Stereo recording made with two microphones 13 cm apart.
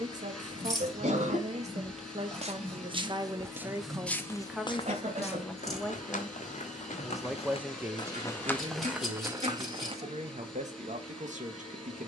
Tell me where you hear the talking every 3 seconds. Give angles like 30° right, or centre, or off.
50° right, 10° right, 10° right, 50° right.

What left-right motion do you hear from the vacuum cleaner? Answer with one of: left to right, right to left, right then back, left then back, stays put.
stays put.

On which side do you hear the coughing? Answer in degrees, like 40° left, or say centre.
50° right.